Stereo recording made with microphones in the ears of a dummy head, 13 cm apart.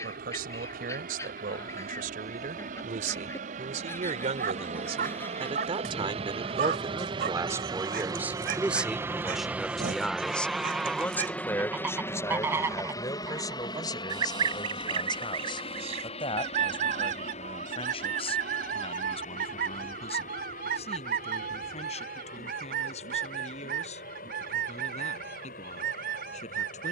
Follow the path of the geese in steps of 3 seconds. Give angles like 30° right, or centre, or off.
20° left, 20° left, 10° left, centre, 20° right, 50° right, 70° right, 70° right, 70° right.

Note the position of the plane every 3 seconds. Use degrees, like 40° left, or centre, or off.
70° right, 60° right, 30° right, centre, 30° left, 40° left, 50° left, 60° left, 60° left.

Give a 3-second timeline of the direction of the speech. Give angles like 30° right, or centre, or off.
70° right, 50° right, 20° right, 10° left, 30° left, 40° left, 40° left, 50° left, 50° left.